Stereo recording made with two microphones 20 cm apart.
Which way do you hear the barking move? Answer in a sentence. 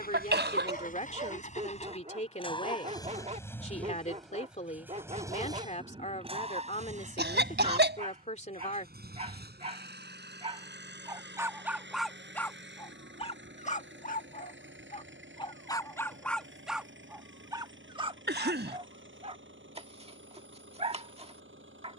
In this clip you hear the barking move from right to left and back again.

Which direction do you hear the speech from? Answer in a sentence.
You can hear the speech on the left.